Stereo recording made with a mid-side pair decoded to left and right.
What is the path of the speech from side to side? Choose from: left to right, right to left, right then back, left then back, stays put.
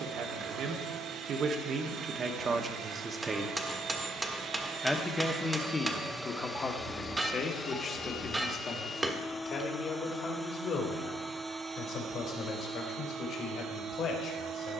right to left.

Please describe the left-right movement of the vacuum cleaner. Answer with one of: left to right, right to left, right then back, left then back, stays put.
left then back.